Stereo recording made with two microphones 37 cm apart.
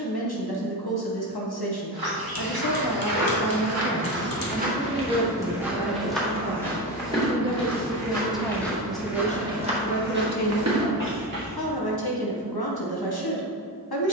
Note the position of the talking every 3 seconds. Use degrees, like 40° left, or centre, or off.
80° left, 20° left, 10° right, 50° left, 80° left.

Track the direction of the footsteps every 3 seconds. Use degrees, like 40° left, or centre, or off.
70° right, 30° right, 10° left, 30° right, off.